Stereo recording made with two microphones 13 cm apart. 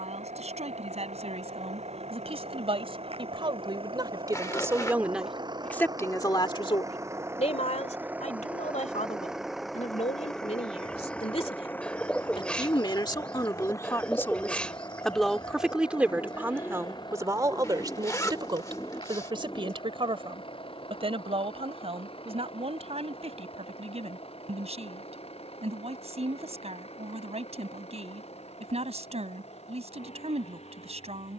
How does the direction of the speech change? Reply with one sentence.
You can hear the speech go left and come back.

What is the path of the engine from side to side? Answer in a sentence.
In this clip you hear the engine travel towards the left.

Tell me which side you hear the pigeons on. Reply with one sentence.
In this clip you hear the pigeons in the centre.